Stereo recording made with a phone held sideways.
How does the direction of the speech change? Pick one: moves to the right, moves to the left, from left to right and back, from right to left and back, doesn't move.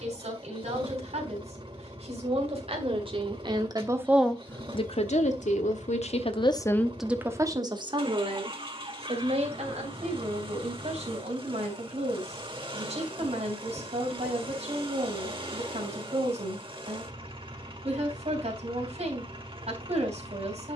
from right to left and back.